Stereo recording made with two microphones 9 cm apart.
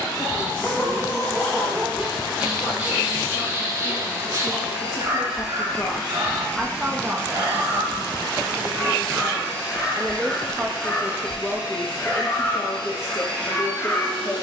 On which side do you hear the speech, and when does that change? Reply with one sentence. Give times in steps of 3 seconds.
In this clip you hear the speech on the left from 0 s, on the right from 6 s, in the centre from 9 s and on the left from 12 s.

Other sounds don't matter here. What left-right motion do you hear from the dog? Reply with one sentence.
In this clip you hear the dog go right and come back.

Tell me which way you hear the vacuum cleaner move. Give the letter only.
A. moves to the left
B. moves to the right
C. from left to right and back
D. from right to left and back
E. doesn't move
A.